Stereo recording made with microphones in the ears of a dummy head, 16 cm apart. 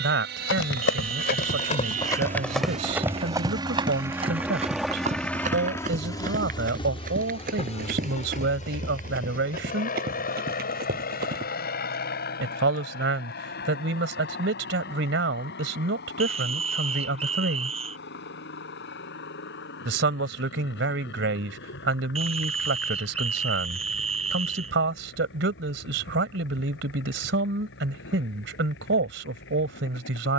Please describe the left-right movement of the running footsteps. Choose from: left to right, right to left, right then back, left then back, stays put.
left to right.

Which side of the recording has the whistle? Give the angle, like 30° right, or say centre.
30° right.